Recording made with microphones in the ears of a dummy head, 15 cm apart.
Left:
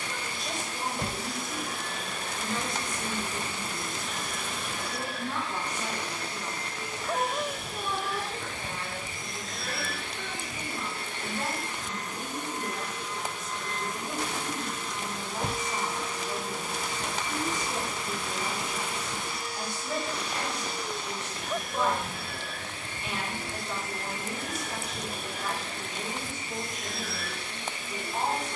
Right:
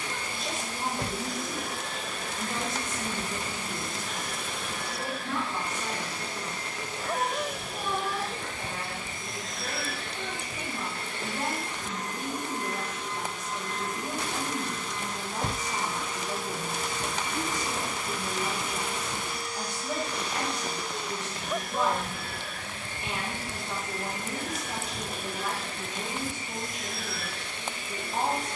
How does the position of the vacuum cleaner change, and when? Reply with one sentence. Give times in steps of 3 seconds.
You can hear the vacuum cleaner on the right from 0 s, in the centre from 12 s and on the left from 15 s.